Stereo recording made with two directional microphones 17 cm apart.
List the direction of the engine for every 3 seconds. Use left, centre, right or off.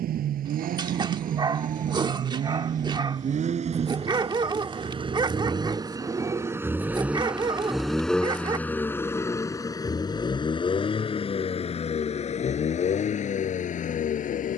right, right, centre, left, left.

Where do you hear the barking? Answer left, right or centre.
right.